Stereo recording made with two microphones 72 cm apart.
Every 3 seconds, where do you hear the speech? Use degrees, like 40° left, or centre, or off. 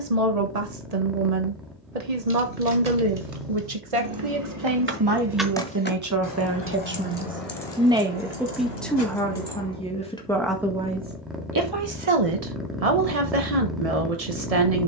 60° right, 40° right, 10° right, 10° right, 50° right.